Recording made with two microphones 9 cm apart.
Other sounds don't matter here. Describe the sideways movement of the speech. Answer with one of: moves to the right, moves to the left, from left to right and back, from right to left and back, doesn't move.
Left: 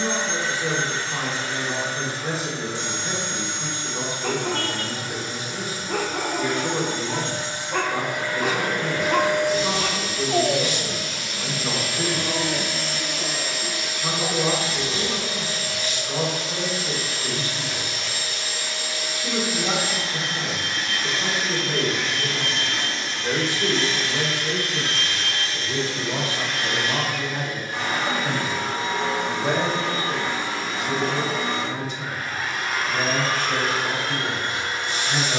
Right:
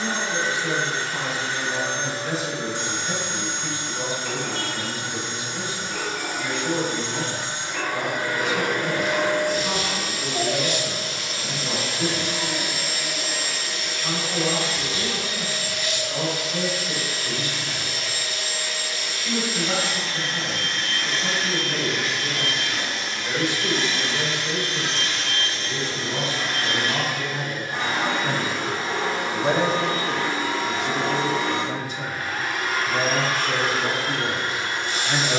moves to the right.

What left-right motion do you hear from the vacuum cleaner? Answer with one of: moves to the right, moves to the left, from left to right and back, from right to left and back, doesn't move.
from right to left and back.